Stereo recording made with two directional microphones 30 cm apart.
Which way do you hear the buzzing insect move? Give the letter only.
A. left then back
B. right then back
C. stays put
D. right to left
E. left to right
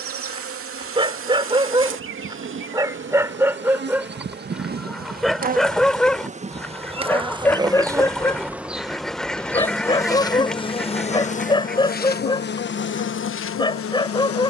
D.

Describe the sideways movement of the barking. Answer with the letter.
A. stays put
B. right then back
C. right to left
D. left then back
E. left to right
C.